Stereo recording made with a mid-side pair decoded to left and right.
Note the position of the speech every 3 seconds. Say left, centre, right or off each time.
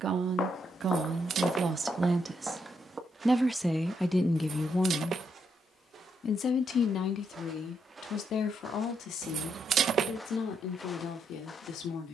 right, centre, left, left.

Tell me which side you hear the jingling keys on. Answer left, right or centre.
right.